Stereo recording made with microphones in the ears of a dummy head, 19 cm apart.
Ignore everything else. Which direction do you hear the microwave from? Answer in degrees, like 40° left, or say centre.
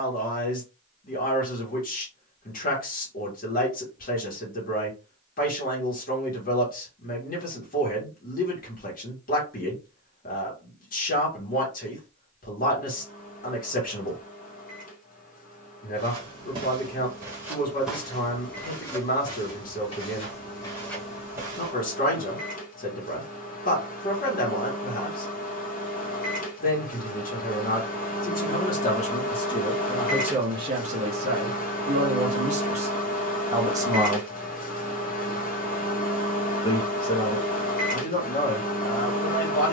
40° left.